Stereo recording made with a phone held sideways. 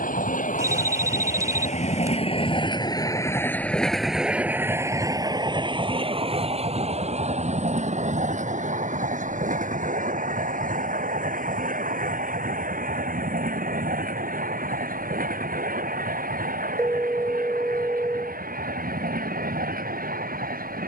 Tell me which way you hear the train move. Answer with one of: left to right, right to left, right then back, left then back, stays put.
left to right.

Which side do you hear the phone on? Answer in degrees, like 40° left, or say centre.
20° right.